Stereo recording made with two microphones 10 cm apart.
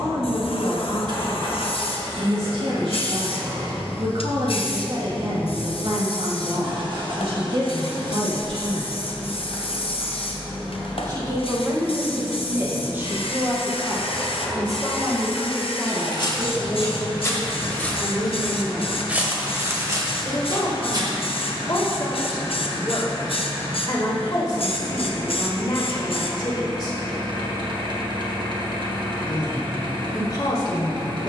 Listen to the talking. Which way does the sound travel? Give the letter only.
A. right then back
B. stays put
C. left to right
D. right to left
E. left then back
D.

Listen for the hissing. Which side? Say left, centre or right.
left.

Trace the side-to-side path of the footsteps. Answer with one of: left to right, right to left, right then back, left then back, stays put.
left to right.